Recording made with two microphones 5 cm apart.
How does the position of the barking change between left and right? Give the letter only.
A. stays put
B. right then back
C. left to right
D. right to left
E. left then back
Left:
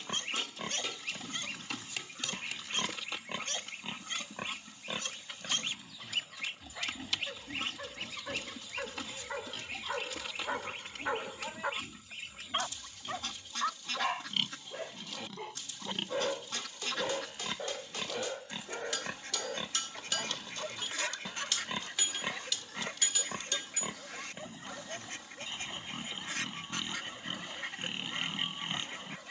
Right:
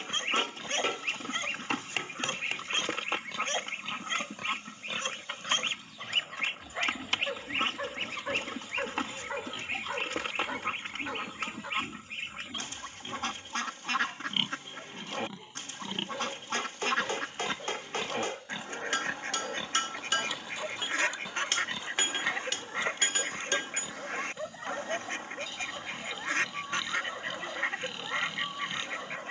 E.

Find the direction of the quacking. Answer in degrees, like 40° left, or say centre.
50° right.